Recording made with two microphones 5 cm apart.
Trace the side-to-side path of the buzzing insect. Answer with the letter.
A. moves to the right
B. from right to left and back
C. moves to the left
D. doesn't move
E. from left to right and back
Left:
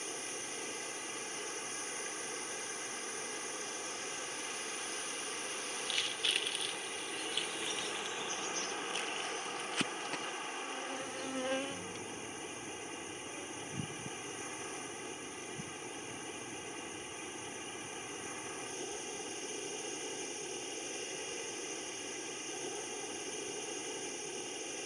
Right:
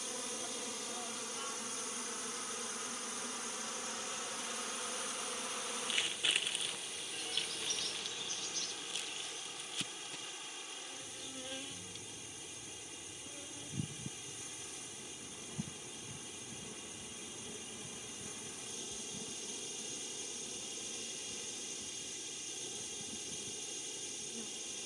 B.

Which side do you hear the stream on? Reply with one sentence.
In this clip you hear the stream on the left.